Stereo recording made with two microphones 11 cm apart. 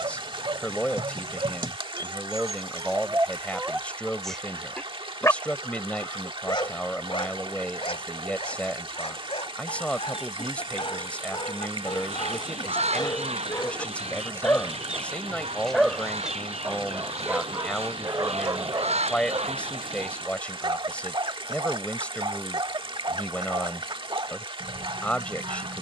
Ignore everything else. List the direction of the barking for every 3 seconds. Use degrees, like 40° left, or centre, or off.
40° right, centre, 60° left, 60° left, 30° left, 10° right, 40° right, 50° right, 50° right.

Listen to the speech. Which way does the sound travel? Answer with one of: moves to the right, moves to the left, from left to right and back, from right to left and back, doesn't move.
doesn't move.